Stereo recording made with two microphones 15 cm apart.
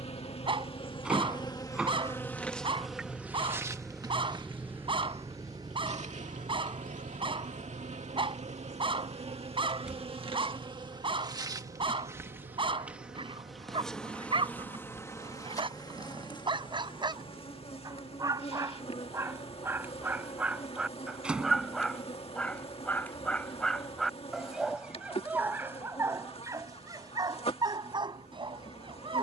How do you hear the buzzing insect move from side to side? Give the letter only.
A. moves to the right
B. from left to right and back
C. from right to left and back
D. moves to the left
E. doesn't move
B.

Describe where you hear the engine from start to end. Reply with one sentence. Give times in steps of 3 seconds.
In this clip you hear the engine on the left from 0 s, in the centre from 3 s and on the right from 6 s.